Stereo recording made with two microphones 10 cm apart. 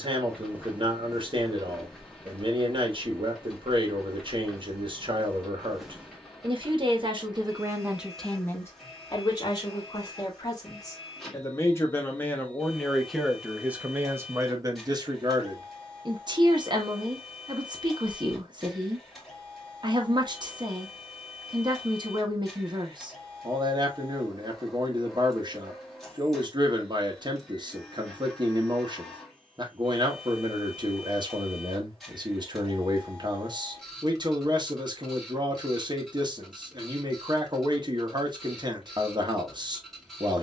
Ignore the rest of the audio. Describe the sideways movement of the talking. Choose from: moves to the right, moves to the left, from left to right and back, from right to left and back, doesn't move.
from right to left and back.